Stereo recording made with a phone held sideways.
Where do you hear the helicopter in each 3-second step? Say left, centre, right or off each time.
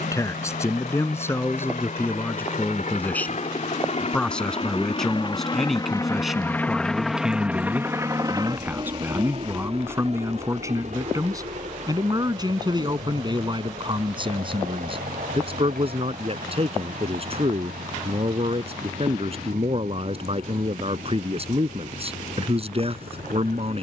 left, left, centre, right, right, right, right, right.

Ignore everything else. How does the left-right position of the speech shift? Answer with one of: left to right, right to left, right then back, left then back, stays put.
left to right.